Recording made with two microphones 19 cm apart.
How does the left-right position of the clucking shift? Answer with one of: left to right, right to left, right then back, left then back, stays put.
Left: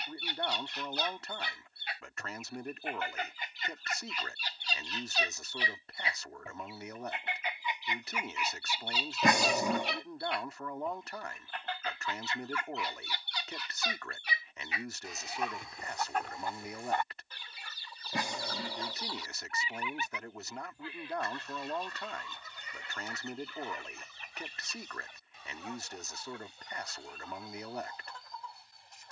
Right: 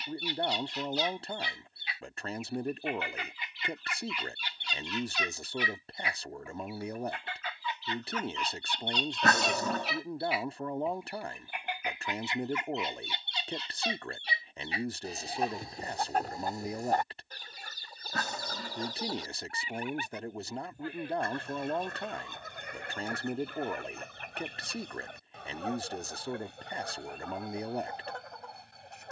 left to right.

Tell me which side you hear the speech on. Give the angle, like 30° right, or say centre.
30° right.